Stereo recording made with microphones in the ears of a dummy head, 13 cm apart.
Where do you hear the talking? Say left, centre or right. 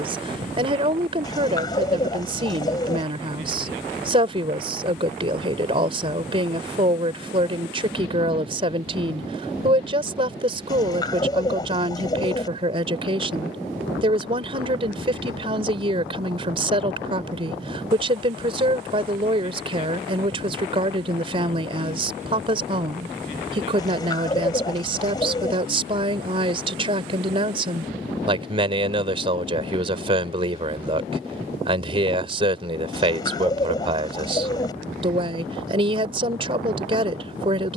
right.